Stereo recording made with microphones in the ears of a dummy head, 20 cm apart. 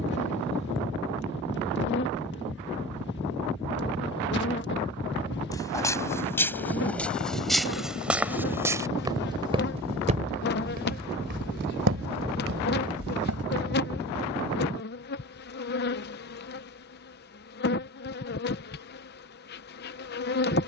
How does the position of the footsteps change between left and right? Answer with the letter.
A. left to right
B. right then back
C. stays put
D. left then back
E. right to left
A.